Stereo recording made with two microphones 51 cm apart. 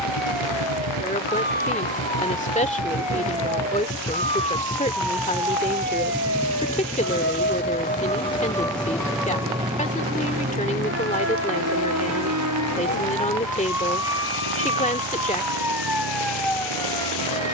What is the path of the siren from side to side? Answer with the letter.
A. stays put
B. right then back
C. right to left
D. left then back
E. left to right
E.